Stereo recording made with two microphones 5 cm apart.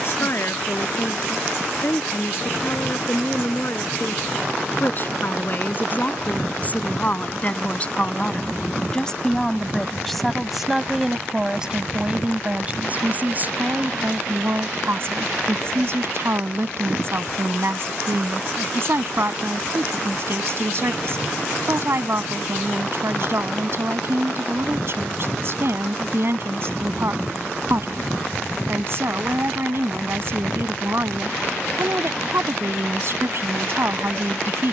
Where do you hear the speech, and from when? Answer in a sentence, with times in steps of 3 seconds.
You can hear the speech on the left from 0 s, in the centre from 9 s and on the right from 12 s.